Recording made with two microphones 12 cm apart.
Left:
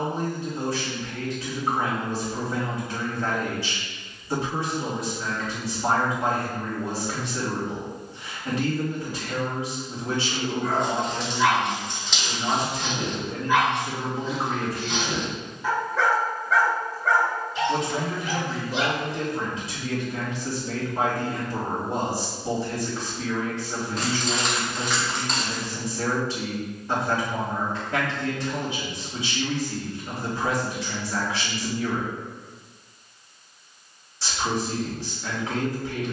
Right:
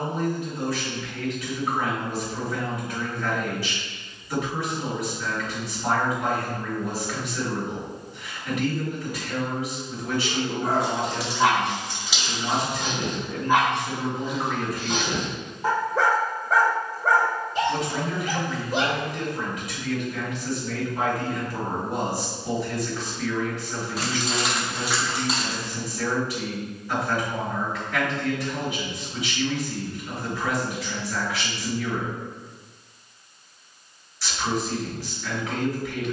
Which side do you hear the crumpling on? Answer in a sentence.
In this clip you hear the crumpling in the centre.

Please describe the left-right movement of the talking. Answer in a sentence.
In this clip you hear the talking stay in one place.